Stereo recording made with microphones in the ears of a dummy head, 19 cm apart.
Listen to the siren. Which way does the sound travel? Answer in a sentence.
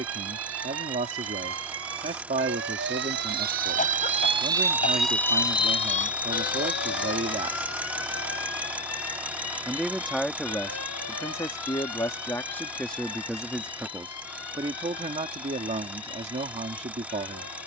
In this clip you hear the siren travel towards the left.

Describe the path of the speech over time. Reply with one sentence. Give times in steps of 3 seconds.
You can hear the speech on the right from 0 s, in the centre from 9 s and on the right from 15 s.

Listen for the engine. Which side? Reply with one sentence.
You can hear the engine in the centre.